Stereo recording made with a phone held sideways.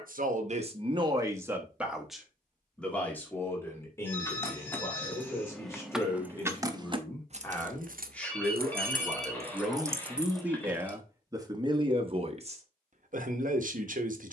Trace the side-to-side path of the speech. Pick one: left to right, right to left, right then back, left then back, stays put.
left then back.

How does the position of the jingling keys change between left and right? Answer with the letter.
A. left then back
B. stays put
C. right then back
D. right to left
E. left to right
C.